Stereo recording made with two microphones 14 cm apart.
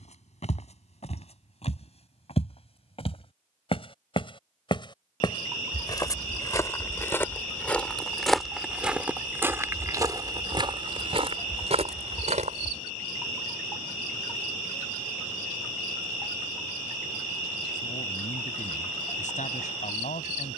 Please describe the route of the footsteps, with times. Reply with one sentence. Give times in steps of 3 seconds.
You can hear the footsteps on the left from 0 s, in the centre from 6 s, on the right from 9 s and not at all from 15 s.